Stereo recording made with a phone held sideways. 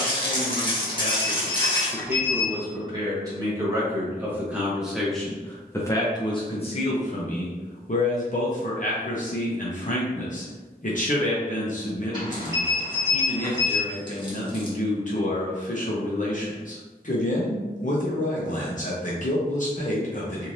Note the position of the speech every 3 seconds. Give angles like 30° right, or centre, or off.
20° left, 10° right, 50° left, 50° left, 50° left, 50° left, 50° left.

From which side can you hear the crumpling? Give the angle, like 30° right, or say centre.
30° left.